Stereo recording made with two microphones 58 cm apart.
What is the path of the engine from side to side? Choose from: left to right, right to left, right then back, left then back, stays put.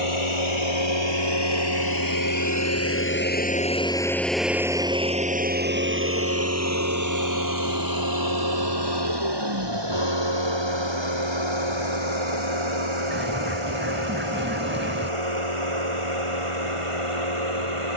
left to right.